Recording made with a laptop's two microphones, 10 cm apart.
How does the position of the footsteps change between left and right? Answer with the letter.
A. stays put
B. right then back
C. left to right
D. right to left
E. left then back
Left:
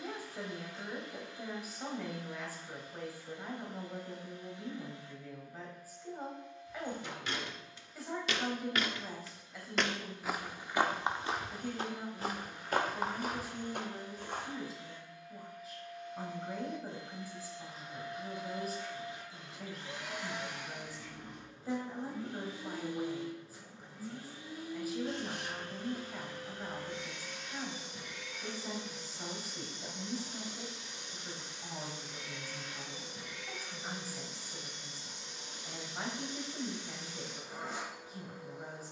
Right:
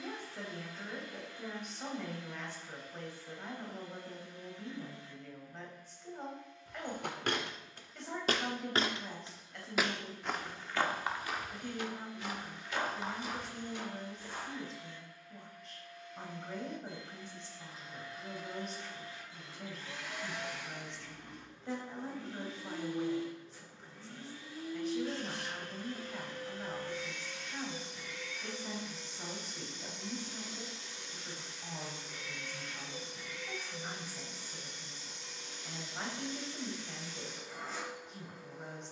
D.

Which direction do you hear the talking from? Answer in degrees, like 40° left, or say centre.
centre.